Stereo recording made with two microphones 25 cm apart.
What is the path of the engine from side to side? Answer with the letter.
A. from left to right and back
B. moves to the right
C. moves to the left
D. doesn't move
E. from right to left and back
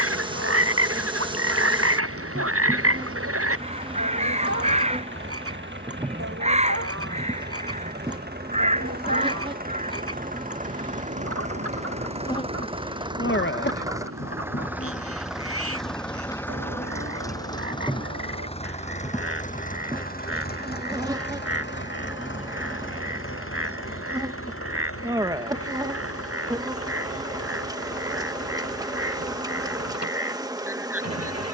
C.